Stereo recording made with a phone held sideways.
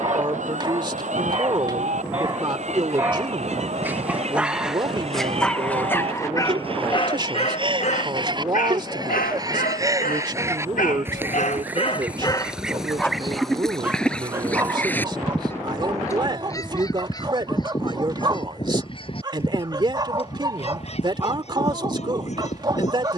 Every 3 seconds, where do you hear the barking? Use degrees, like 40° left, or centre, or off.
30° right, centre, 40° left, 70° left, centre, 30° right, 30° right, 30° right.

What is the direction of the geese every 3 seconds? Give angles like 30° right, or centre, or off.
50° right, 50° right, 40° right, 20° right, centre, 20° left, 40° left, 50° left.